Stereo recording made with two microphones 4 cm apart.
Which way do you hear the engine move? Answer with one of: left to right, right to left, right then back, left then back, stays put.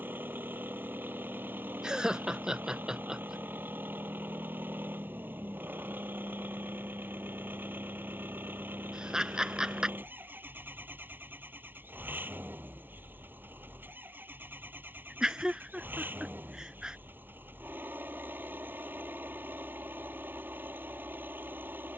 stays put.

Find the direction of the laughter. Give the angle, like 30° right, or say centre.
20° right.